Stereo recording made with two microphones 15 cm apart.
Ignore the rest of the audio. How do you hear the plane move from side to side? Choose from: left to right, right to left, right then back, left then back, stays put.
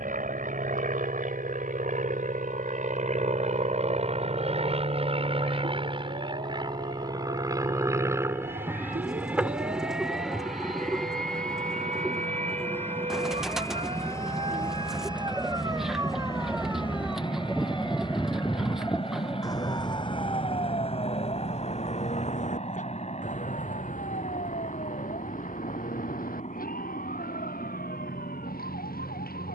right to left.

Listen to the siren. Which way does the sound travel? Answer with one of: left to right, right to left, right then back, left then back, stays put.
right to left.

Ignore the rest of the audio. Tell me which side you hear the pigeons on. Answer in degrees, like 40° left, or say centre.
centre.